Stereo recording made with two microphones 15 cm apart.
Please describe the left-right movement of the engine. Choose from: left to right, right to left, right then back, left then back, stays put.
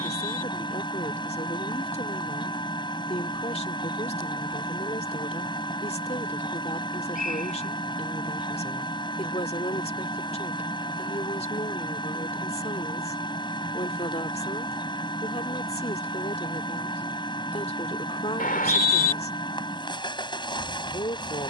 stays put.